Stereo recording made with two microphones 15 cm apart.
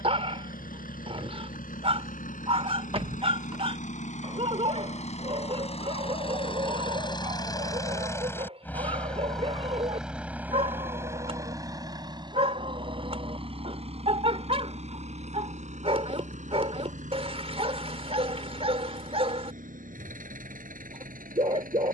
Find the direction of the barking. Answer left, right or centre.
right.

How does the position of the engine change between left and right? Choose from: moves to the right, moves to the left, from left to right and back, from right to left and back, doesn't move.
moves to the right.